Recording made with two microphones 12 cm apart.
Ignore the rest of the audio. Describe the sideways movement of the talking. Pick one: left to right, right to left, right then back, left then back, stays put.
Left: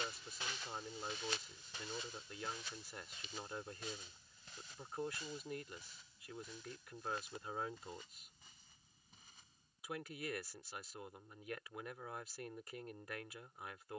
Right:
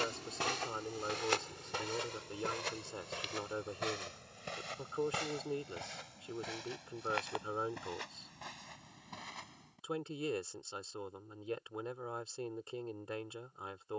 stays put.